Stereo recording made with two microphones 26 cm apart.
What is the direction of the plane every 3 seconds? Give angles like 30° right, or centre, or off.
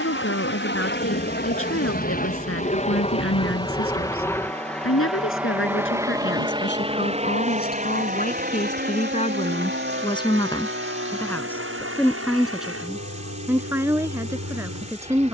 40° left, 10° left, 20° right, 40° right, 50° right.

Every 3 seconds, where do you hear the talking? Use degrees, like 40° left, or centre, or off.
60° left, 60° left, 40° left, 20° left, 10° right.